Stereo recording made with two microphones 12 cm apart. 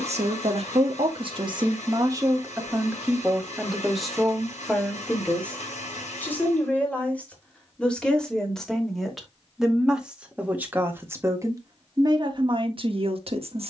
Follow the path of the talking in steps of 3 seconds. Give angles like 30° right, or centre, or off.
40° right, centre, 10° left, 10° right, 50° right.